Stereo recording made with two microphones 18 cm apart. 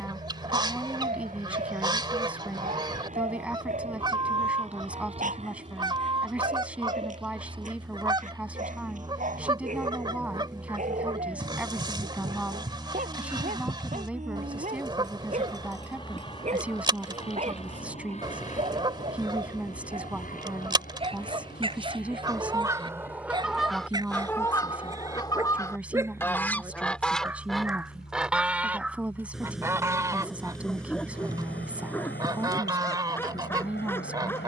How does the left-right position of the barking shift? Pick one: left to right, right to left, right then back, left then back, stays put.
right to left.